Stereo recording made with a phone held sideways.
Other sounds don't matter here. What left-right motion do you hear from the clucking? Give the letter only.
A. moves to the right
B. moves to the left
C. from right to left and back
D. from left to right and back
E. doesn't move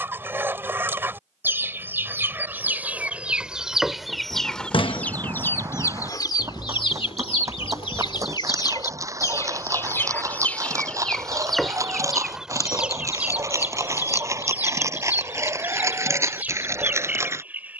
C.